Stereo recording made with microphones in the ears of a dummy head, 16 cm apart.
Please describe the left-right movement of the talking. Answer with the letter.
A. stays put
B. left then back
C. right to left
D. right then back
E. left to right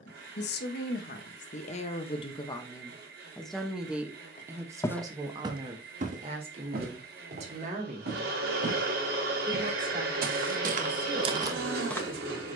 E.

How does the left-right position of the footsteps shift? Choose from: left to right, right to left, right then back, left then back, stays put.
right then back.